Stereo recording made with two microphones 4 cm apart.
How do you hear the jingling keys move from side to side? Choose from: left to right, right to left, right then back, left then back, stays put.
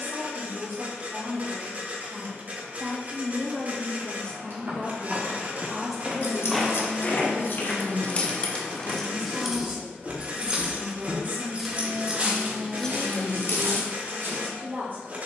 right then back.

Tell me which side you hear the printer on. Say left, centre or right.
right.